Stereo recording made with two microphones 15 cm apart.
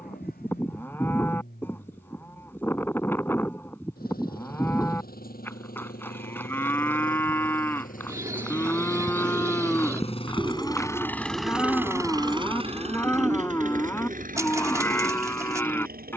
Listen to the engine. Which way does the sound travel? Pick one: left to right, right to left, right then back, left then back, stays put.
left to right.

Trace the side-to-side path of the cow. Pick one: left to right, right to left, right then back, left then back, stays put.
stays put.